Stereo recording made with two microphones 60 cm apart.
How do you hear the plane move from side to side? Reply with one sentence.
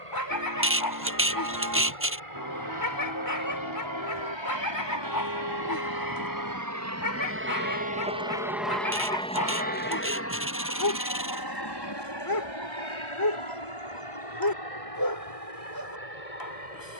In this clip you hear the plane go from the right side to the left.